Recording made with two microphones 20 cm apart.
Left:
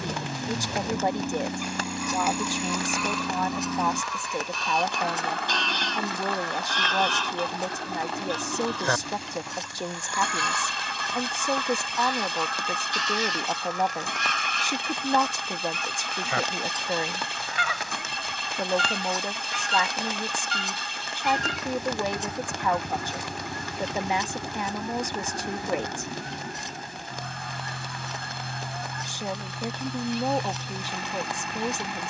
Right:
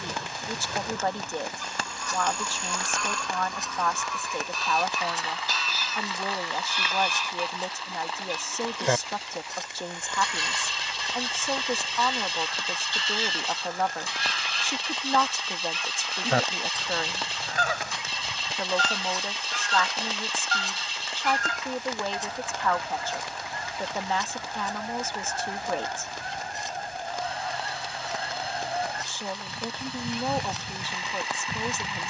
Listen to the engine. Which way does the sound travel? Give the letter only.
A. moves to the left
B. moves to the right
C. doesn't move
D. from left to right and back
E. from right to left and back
C.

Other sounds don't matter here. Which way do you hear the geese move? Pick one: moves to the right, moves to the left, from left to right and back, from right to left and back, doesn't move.
moves to the right.